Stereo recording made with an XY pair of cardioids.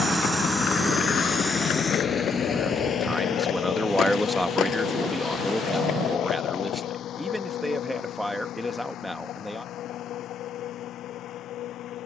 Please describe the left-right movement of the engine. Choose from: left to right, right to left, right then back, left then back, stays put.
right to left.